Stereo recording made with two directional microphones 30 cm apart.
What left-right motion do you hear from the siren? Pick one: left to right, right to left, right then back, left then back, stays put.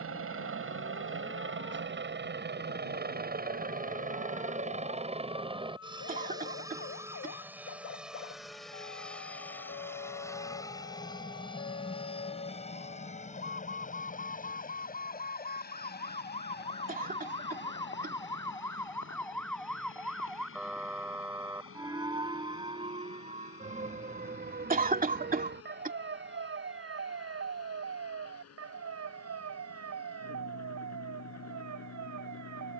left to right.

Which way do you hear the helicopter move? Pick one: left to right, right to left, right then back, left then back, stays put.
right to left.